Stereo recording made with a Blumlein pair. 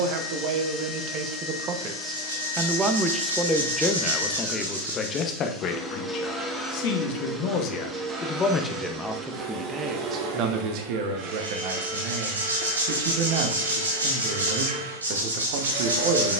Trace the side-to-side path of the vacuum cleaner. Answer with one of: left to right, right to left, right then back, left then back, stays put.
left to right.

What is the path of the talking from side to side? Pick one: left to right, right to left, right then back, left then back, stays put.
left then back.